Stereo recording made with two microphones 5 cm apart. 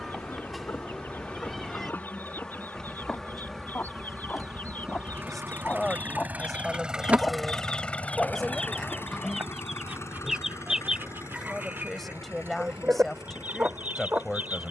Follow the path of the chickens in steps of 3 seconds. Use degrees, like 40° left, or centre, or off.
40° left, 40° left, 20° left, 10° right, 30° right.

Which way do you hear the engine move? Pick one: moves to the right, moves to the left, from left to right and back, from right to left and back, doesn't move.
moves to the left.